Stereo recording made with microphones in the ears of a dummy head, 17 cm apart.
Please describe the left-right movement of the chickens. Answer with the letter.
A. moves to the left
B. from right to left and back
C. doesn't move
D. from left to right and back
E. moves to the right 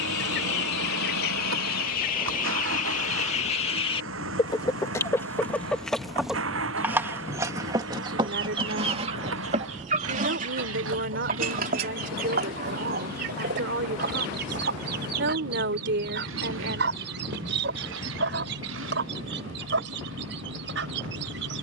E.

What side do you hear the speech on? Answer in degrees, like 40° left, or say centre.
60° right.